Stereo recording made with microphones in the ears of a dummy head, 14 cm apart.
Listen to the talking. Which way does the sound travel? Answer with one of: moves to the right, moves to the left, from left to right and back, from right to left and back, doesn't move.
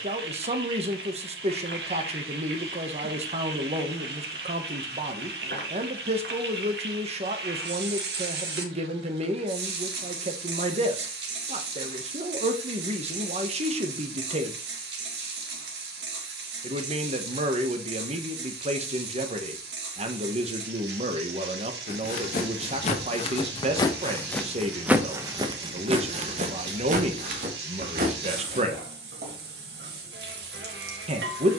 doesn't move.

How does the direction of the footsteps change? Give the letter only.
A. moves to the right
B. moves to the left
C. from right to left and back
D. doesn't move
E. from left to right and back
A.